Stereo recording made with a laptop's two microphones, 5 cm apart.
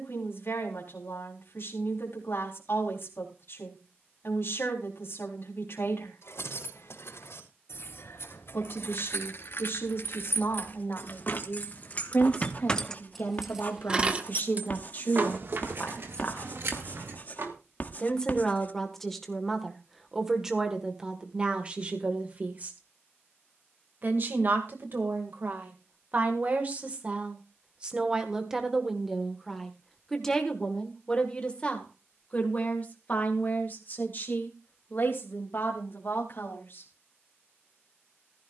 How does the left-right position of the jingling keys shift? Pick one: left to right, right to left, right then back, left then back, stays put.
left to right.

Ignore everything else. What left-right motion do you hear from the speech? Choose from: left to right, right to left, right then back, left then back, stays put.
right then back.